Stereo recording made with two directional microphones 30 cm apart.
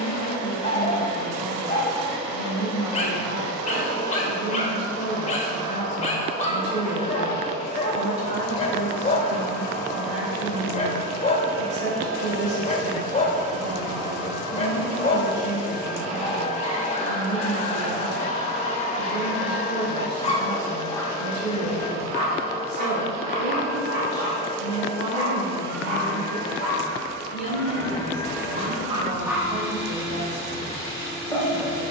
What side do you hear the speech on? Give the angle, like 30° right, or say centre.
40° right.